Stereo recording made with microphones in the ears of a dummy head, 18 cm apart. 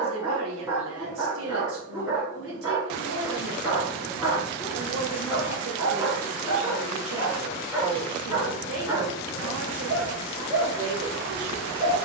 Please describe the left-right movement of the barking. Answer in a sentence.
In this clip you hear the barking stay put.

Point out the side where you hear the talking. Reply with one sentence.
In this clip you hear the talking on the right.